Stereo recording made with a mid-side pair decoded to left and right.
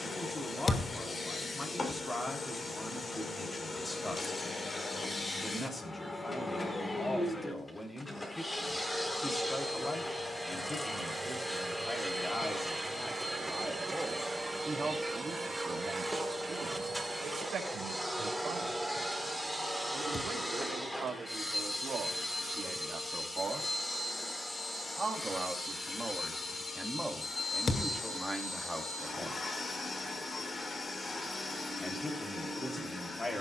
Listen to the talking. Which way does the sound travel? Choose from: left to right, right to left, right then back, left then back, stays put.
right then back.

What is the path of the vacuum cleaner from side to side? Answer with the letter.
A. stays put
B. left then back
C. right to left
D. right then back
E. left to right
D.